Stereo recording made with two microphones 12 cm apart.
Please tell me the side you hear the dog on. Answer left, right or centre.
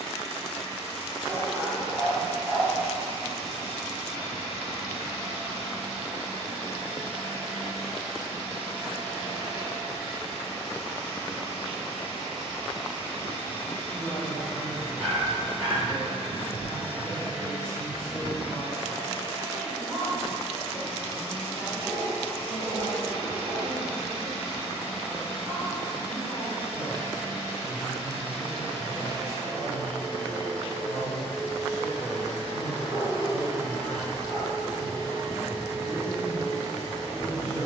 centre.